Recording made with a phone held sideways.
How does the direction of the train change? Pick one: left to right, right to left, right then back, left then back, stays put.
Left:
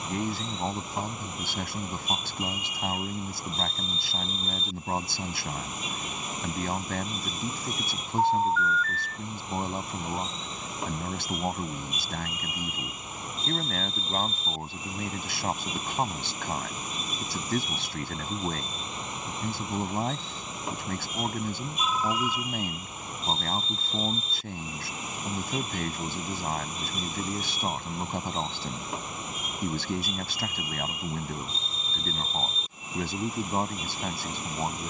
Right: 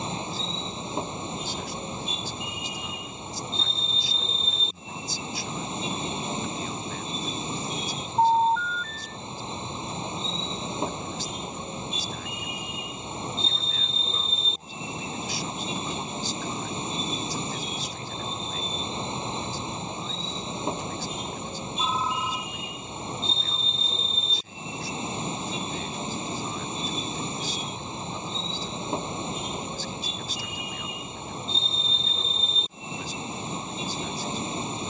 stays put.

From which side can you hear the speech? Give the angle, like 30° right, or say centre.
70° left.